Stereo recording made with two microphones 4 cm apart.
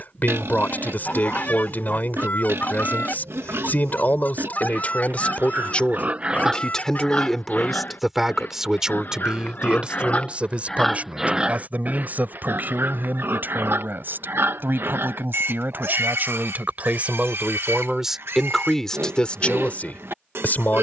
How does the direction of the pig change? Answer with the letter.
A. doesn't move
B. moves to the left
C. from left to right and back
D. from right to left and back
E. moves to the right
D.